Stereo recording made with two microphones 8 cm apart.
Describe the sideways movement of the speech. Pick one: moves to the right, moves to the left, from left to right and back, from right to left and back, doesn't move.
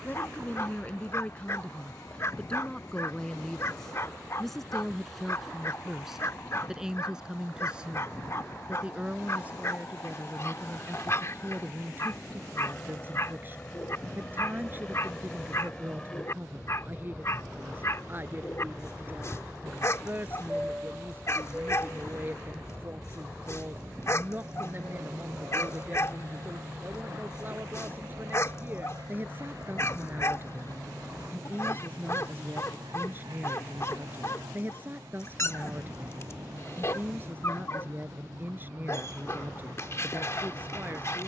moves to the right.